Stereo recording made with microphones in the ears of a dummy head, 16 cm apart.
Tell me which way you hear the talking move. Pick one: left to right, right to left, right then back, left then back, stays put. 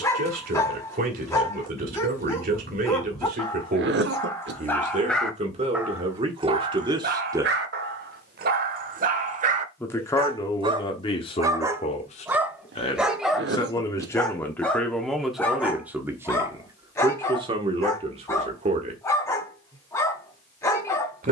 left then back.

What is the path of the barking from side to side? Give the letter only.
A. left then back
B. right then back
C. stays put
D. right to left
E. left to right
B.